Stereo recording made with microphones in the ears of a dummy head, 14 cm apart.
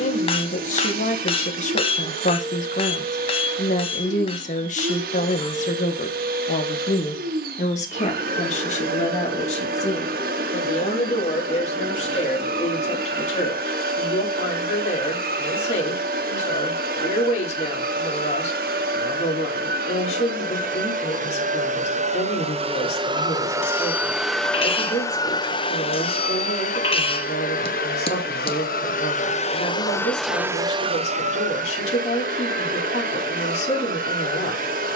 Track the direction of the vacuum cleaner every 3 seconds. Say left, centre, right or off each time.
right, right, right, right, right, right, right, right, left, left, right, right.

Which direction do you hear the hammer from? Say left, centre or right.
left.